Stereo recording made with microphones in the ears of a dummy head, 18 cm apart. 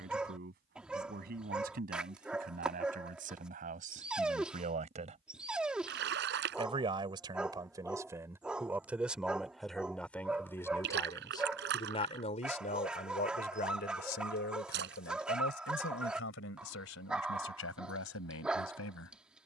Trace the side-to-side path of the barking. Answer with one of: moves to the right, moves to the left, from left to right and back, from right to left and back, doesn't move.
doesn't move.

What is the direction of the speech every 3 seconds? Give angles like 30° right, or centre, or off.
50° right, 40° right, 20° right, 10° left, 40° left, 70° left, 80° left.